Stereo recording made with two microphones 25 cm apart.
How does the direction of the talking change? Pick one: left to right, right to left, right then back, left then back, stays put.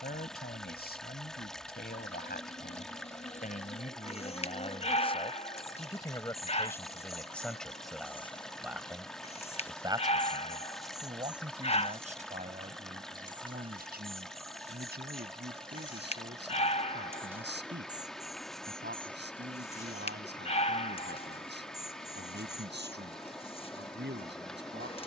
left to right.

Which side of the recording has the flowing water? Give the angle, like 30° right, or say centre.
centre.